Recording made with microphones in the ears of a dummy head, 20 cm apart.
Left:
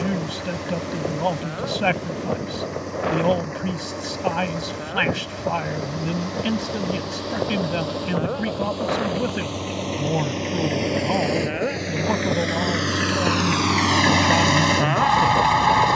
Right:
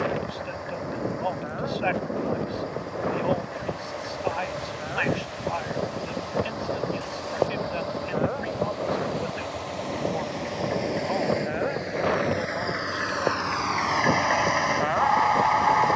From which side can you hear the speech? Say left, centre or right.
left.